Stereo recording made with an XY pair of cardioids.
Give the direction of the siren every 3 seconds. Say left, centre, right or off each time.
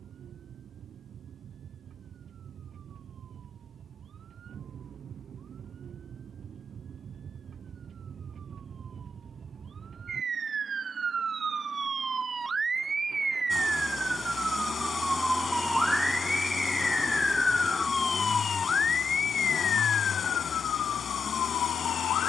right, right, right, right, right, centre, left, left.